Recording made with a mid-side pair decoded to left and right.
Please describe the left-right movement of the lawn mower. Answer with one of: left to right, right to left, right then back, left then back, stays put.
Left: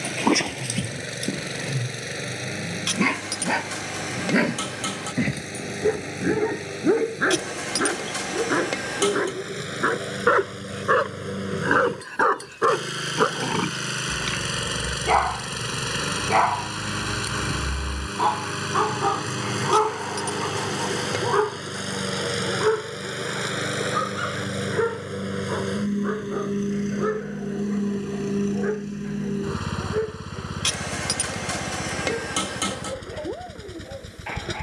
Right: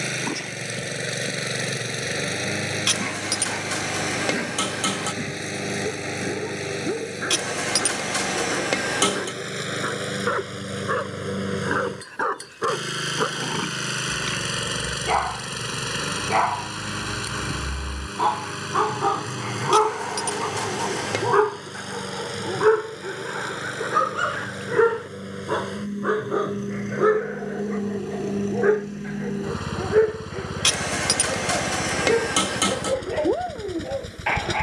left then back.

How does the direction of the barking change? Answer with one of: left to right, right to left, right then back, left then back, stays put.
left to right.